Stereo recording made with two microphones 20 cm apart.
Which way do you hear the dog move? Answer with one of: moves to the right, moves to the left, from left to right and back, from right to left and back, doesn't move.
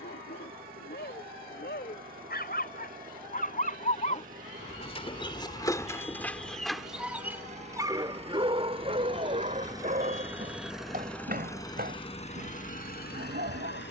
moves to the right.